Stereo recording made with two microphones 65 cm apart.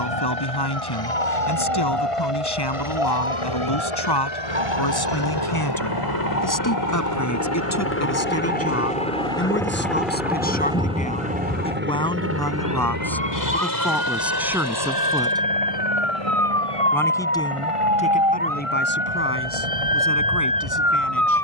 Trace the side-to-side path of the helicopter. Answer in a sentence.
You can hear the helicopter go from the left side to the right.